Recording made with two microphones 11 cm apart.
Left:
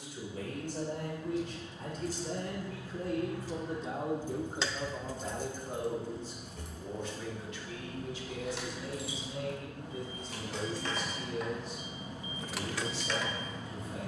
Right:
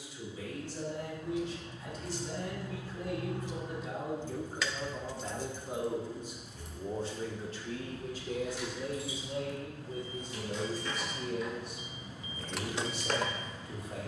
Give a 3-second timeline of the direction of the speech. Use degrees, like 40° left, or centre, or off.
50° left, 20° left, 40° right, 60° right, 70° right.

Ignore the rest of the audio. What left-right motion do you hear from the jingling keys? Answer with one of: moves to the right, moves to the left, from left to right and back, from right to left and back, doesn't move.
from right to left and back.